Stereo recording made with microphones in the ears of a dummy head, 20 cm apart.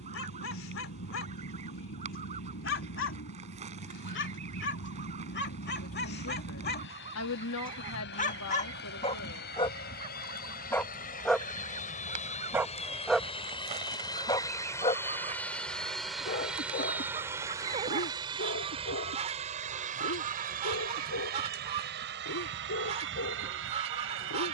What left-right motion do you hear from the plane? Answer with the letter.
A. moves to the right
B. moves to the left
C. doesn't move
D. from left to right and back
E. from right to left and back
A.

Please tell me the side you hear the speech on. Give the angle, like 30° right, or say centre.
60° left.